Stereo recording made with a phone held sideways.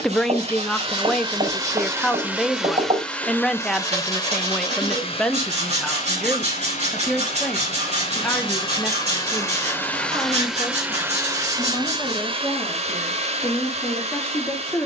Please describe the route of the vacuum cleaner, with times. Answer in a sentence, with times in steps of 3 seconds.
You can hear the vacuum cleaner on the right from 0 s, on the left from 3 s, in the centre from 9 s and on the right from 12 s.